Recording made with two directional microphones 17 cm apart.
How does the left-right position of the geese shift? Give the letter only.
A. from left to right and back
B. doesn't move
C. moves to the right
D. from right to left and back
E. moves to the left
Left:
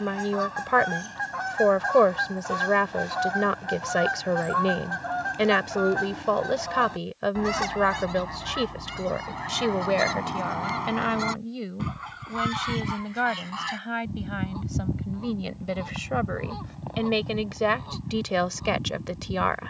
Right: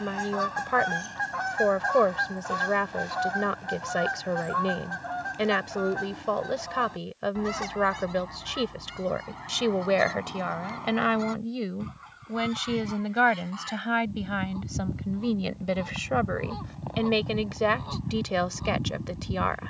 D.